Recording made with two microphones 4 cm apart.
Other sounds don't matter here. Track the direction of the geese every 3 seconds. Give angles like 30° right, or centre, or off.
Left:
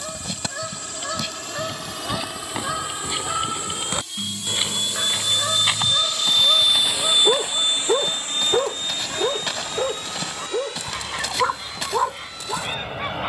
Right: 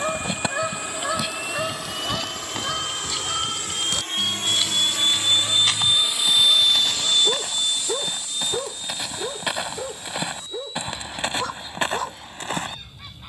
10° right, 30° left, 40° left, 50° left, 50° left.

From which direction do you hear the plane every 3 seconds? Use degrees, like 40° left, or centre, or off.
70° right, 50° right, 20° left, 60° left, 70° left.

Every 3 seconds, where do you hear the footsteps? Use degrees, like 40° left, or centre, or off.
centre, 20° left, centre, 20° right, 40° right.